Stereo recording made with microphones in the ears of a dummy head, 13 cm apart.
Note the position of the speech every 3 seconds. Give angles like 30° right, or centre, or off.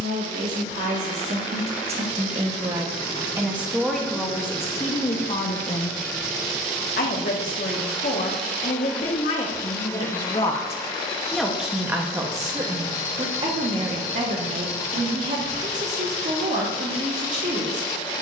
40° right, 10° left, 60° left, 20° left, 40° right, 50° right.